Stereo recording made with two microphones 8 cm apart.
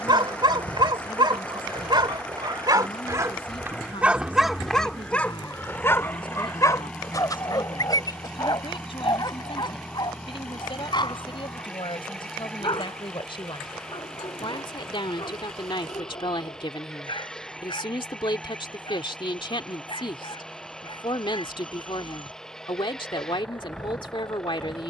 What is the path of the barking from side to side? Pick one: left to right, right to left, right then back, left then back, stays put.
right to left.